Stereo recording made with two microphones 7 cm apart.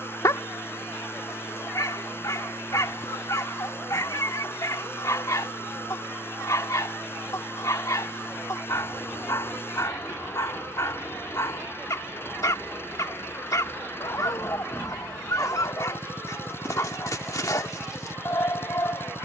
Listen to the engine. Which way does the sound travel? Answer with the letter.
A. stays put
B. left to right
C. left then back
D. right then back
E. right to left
A.